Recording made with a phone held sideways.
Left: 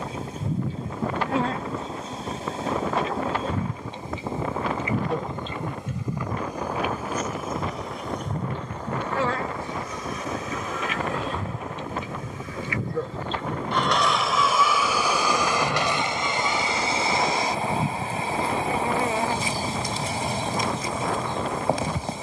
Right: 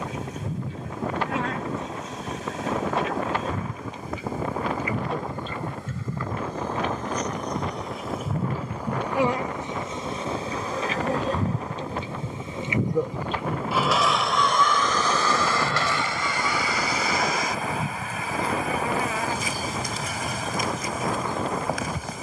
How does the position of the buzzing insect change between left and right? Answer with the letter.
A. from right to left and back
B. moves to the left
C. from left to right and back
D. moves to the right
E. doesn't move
C.